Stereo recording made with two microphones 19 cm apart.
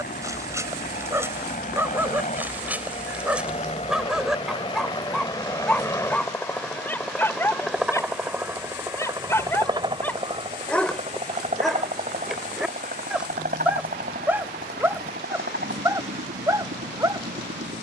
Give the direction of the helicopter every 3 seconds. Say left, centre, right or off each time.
left, left, centre, right, right, right.